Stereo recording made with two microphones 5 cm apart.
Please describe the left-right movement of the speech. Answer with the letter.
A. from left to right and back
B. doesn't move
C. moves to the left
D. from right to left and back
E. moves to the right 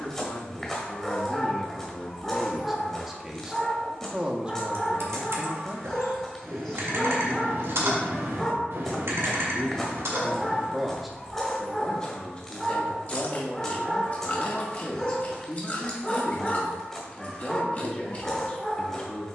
A.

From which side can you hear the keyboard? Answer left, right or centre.
right.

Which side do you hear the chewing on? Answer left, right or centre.
left.